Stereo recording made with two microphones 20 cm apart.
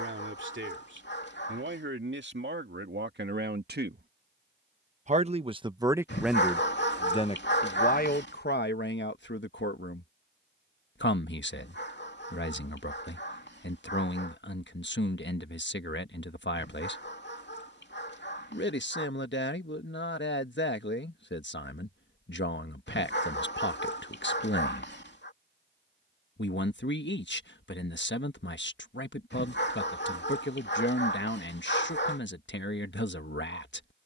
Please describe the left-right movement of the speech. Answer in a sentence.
In this clip you hear the speech travel towards the left.